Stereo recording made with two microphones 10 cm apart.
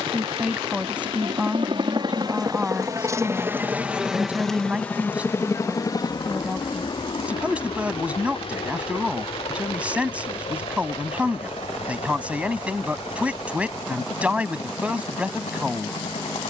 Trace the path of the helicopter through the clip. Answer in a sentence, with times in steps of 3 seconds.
In this clip you hear the helicopter on the right from 0 s, in the centre from 3 s and on the left from 6 s.